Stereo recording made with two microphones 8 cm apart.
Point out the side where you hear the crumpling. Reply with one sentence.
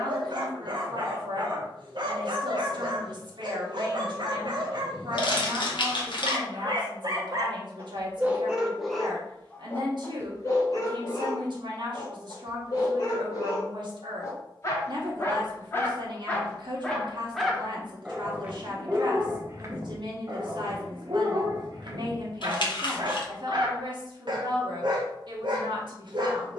You can hear the crumpling on the left.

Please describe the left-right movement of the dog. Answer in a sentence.
You can hear the dog move from right to left and back again.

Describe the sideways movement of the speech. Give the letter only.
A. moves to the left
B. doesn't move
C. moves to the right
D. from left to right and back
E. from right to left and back
B.